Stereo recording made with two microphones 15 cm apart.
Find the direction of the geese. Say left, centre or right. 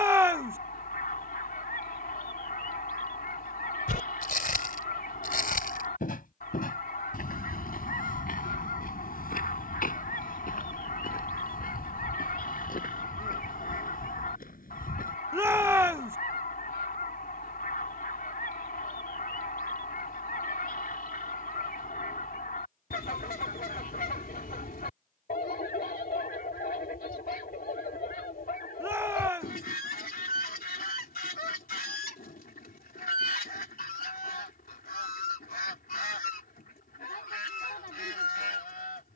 left.